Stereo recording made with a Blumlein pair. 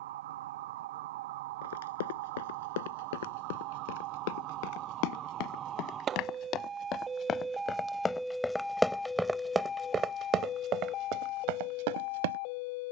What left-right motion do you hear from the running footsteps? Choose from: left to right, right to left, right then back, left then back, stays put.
left to right.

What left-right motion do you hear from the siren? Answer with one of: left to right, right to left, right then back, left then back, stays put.
right to left.